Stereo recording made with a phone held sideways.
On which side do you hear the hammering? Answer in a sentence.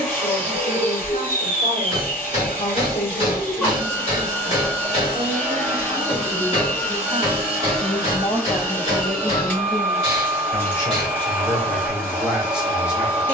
You can hear the hammering on the left.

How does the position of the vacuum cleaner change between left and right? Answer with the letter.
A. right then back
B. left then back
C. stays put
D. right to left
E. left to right
C.